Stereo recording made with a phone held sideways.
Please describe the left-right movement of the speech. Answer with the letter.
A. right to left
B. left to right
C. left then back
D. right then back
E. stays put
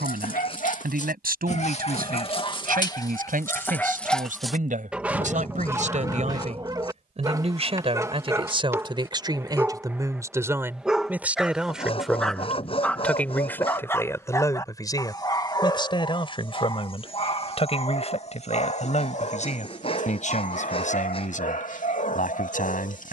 A.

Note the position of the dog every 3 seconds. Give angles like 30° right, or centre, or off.
40° left, centre, 20° right, 10° right, 10° left, 30° left, 50° left, 50° left.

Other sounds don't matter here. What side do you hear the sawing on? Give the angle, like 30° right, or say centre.
40° left.